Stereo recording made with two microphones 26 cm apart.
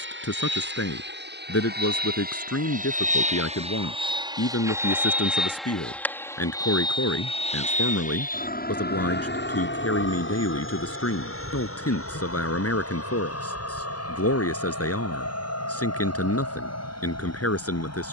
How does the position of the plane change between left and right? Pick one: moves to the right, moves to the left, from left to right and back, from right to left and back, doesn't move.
moves to the left.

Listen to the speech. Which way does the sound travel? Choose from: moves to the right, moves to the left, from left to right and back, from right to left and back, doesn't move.
doesn't move.